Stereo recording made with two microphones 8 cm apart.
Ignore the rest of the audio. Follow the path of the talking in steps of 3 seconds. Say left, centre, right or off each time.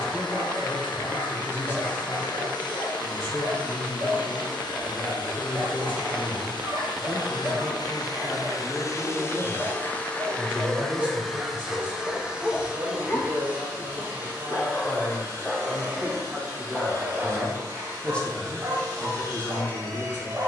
left, left, left, centre, right, centre, left.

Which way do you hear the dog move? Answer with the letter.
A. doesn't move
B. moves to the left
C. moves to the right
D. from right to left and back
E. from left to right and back
D.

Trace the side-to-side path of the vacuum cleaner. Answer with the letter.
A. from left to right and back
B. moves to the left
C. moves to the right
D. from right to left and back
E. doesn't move
C.